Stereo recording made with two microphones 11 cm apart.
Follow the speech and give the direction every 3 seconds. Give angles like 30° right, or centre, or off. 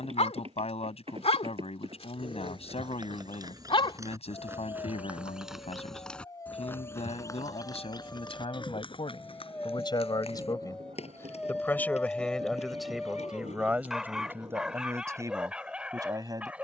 60° left, 60° left, 60° left, 30° left, 10° right, 30° right.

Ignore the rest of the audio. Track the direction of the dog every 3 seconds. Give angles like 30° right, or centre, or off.
60° left, 40° left, 20° left, 10° left, centre, 10° right.